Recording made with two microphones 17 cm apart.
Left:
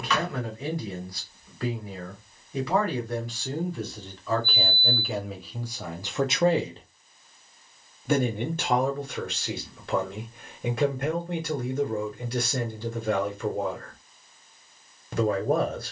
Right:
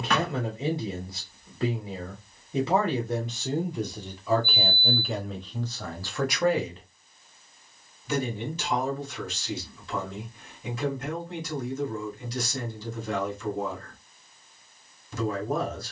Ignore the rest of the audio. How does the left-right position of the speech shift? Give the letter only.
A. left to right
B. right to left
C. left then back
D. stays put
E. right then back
B.